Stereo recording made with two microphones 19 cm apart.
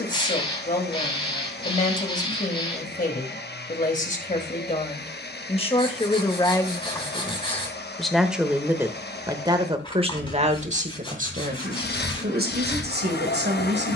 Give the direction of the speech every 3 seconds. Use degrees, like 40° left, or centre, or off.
40° left, 40° left, 10° left, 40° right, 60° right.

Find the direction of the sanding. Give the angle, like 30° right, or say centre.
30° left.